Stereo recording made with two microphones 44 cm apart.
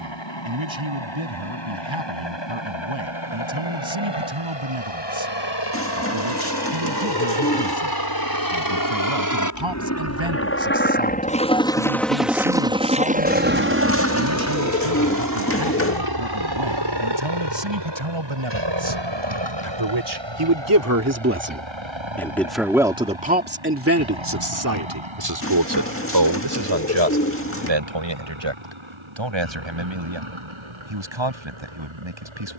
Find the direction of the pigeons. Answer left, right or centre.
left.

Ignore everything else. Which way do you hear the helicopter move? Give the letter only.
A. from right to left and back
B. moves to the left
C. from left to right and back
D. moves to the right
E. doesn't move
D.